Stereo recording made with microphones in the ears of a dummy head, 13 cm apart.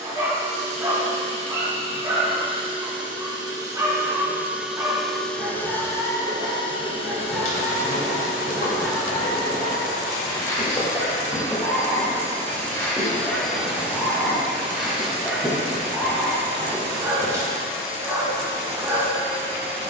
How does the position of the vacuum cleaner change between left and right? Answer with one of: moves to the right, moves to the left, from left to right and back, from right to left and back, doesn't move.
from right to left and back.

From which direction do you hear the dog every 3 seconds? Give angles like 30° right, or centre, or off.
20° right, 20° right, 10° right, 20° left, 10° left, 10° right, 20° right.